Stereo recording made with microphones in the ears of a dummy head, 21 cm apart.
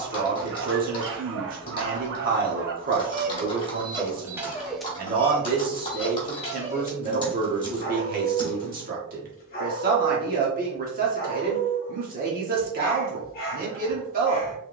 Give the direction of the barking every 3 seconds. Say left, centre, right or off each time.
right, centre, left, left, left.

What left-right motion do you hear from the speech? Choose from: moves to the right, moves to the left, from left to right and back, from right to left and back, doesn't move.
doesn't move.